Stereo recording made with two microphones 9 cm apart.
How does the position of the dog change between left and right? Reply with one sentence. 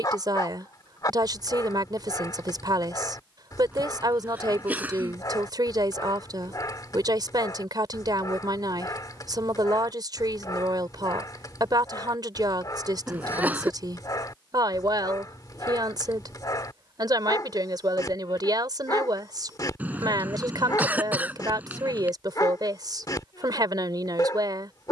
You can hear the dog stay put.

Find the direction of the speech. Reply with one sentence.
In this clip you hear the speech on the right.